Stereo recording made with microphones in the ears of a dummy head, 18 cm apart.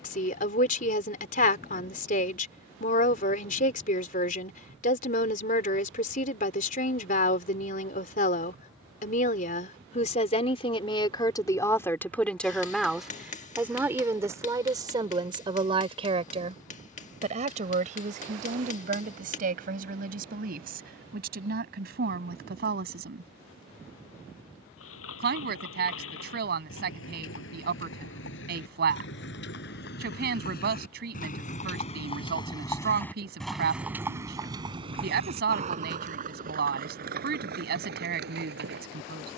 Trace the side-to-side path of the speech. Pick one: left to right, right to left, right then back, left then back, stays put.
left to right.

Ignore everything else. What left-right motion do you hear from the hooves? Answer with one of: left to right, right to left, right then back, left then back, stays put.
left to right.